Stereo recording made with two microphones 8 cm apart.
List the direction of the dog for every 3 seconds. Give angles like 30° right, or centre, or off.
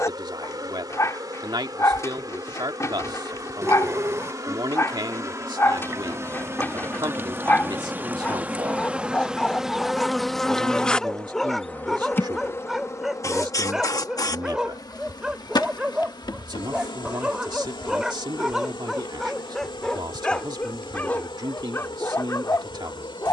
40° left, 40° left, 20° left, 10° left, 10° right, 10° right, 10° left, 30° left.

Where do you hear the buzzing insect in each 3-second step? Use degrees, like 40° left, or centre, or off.
50° right, 40° right, 30° right, 10° left, 40° left, 60° left, 80° left, 80° left.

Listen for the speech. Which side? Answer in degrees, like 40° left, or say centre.
60° right.